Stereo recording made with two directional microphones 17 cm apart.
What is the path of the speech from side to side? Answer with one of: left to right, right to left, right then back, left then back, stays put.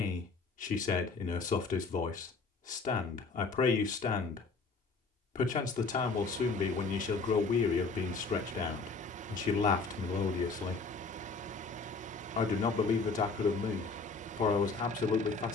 stays put.